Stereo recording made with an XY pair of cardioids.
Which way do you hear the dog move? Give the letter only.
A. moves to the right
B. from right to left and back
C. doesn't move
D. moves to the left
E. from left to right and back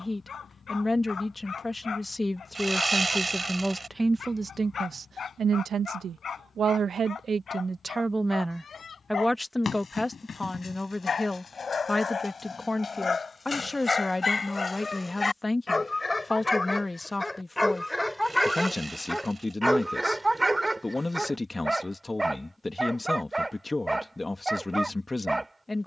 A.